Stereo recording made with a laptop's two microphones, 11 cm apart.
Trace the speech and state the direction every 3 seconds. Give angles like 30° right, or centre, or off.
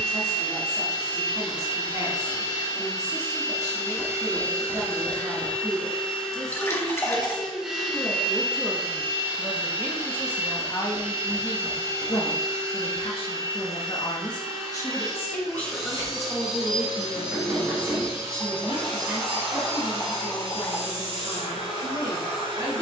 40° right, 40° right, 20° right, 20° left, 50° left, centre, 30° right, 40° right.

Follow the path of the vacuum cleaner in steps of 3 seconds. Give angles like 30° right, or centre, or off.
50° left, 20° left, centre, 20° right, 40° right, 40° right, 50° right, 50° right.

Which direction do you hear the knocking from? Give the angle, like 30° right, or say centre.
20° right.